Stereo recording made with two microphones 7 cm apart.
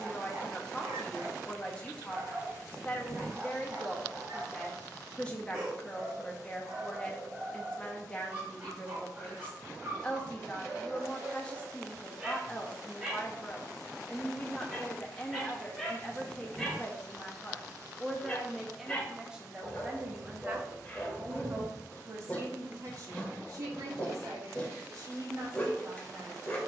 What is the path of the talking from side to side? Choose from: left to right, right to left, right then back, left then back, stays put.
left to right.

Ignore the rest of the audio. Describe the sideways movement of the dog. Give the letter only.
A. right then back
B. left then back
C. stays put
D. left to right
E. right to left
E.